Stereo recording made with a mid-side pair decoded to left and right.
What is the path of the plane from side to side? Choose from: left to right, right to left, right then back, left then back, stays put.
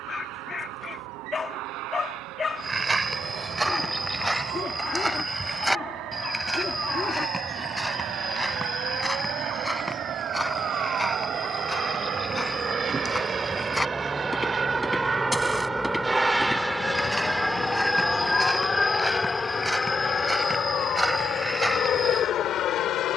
right to left.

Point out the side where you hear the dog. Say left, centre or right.
left.